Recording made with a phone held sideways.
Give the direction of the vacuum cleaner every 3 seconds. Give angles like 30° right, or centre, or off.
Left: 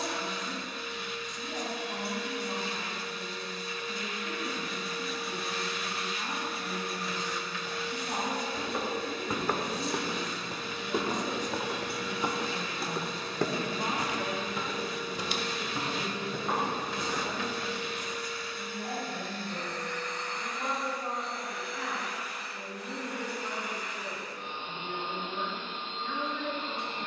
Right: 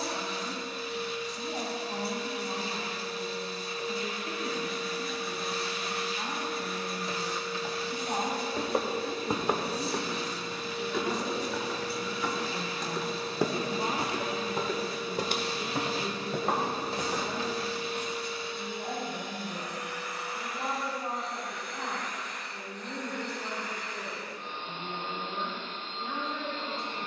40° right, 40° right, 40° right, 40° right, 40° right, 40° right, 20° right, 10° left, 20° left.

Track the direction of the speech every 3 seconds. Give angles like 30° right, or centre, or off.
30° right, 30° right, 30° right, 30° right, centre, 20° right, 30° right, 30° right, 30° right.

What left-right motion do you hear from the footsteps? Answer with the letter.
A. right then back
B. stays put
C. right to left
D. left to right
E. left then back
E.